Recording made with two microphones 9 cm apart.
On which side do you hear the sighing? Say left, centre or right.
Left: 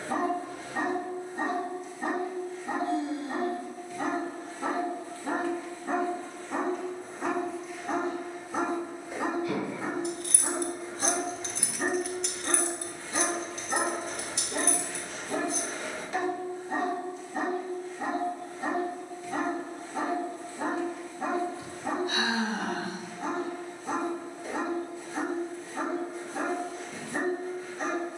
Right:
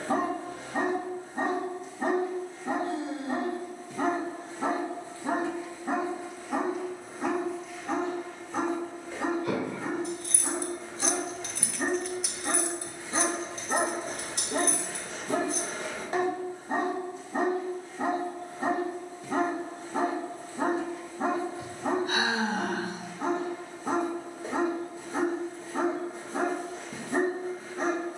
right.